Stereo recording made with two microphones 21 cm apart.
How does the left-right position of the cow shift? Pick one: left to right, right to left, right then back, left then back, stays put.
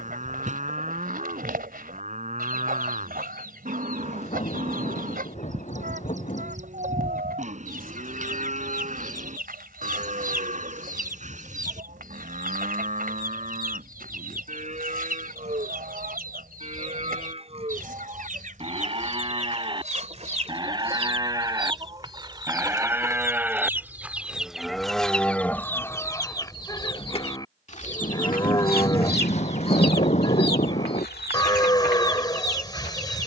right to left.